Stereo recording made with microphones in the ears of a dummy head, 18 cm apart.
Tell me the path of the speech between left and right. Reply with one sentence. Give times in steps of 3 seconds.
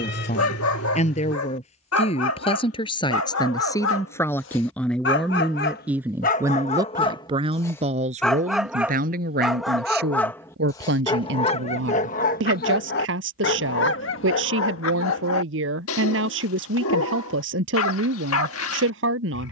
You can hear the speech on the left from 0 s, in the centre from 3 s and on the right from 6 s.